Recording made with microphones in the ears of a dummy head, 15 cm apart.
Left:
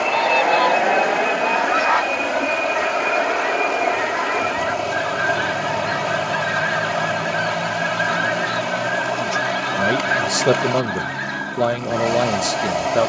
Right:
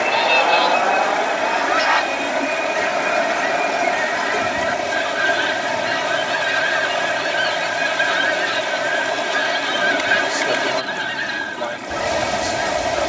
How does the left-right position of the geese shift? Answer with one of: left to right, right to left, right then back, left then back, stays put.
stays put.